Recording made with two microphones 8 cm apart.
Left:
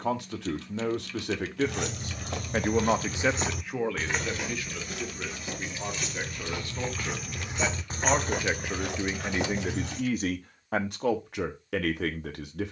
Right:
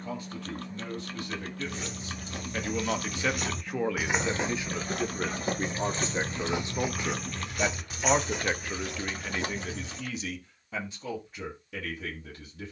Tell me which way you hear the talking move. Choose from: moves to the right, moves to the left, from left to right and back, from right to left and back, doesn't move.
from left to right and back.